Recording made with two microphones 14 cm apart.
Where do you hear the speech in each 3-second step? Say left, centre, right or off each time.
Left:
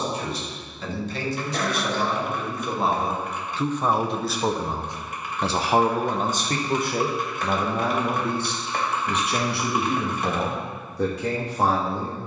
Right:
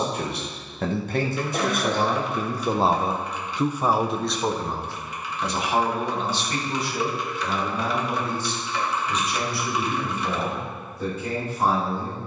right, centre, left, left.